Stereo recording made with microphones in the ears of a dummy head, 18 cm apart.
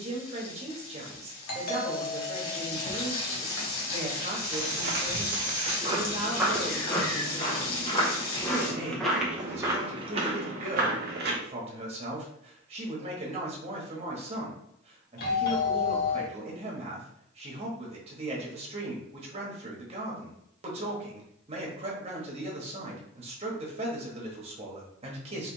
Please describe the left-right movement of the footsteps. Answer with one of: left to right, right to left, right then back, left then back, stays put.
left then back.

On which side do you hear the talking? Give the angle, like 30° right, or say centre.
30° right.